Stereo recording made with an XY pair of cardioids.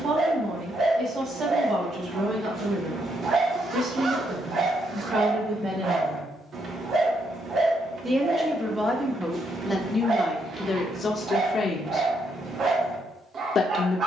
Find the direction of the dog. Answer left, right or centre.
right.